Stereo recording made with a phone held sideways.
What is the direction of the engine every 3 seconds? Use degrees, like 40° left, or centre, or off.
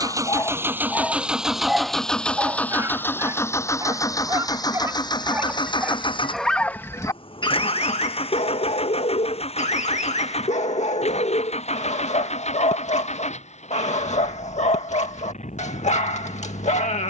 centre, 30° left, 40° left, 50° left, 50° left, 50° left.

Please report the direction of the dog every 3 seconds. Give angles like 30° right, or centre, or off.
centre, 20° right, 30° left, 50° left, 50° left, 50° left.